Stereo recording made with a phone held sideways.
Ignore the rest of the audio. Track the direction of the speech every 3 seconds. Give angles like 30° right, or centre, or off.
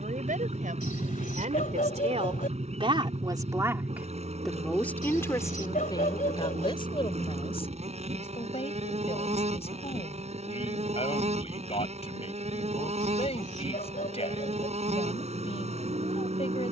60° right, centre, 40° left, 50° left, 50° left, 50° left.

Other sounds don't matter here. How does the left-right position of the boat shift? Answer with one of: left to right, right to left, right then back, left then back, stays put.
stays put.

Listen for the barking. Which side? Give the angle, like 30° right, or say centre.
80° left.